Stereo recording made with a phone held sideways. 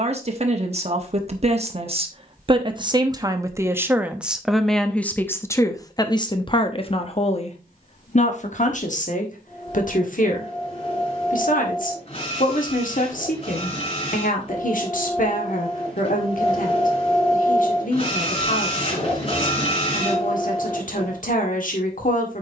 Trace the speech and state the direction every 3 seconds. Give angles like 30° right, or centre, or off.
40° right, centre, 40° left, 60° left, 70° left, 70° left, 70° left, 70° left.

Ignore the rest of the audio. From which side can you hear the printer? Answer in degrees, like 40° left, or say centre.
40° left.